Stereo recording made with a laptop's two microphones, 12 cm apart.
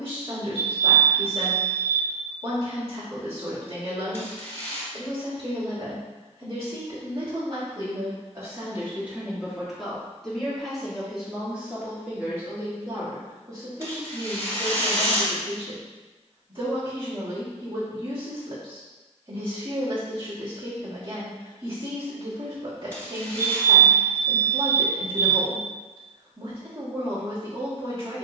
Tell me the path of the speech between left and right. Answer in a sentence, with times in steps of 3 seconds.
In this clip you hear the speech on the right from 0 s, in the centre from 9 s and on the right from 12 s.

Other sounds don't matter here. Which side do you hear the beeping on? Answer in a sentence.
You can hear the beeping on the right.